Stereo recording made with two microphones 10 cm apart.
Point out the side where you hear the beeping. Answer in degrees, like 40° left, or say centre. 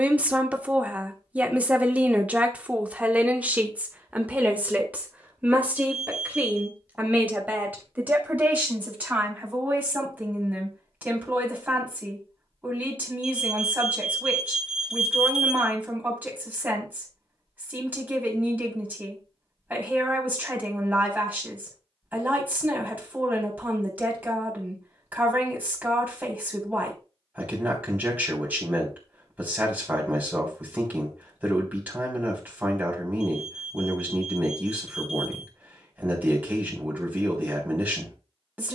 10° right.